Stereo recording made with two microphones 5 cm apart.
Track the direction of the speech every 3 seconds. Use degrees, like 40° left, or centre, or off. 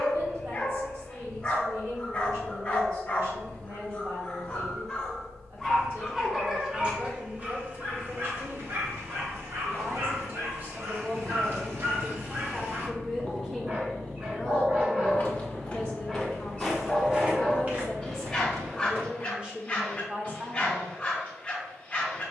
60° right, 60° right, 60° right, 40° right, 10° right, 20° left, 20° right, off.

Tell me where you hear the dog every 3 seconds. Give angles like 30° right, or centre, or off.
20° left, 20° left, 30° right, 60° right, 40° right, 10° right, 20° left, 20° left.